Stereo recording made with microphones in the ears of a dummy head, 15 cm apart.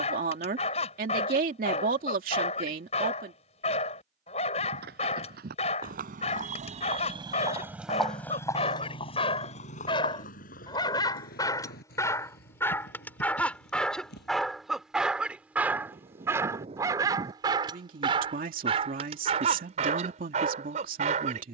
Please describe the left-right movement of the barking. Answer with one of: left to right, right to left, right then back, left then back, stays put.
left to right.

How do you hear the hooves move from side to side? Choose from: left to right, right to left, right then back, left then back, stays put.
right to left.